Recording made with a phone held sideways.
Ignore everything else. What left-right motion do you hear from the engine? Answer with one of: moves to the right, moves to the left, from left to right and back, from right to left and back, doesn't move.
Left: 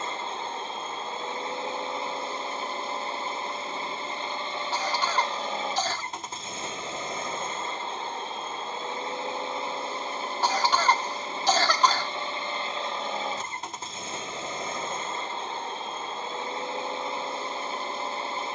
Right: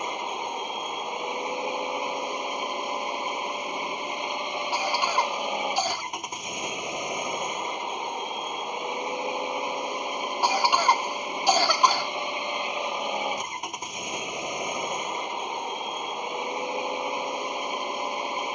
doesn't move.